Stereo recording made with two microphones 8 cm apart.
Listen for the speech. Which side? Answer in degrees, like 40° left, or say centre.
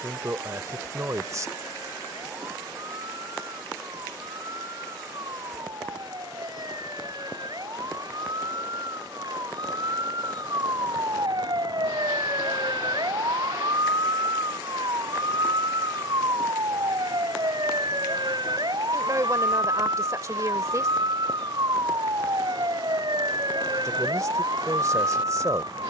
40° right.